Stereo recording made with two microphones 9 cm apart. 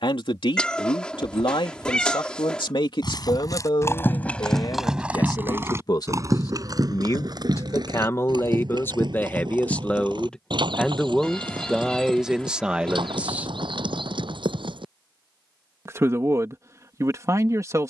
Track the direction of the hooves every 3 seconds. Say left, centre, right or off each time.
off, centre, right, right, right, off.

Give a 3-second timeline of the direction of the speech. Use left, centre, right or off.
left, left, left, centre, centre, right.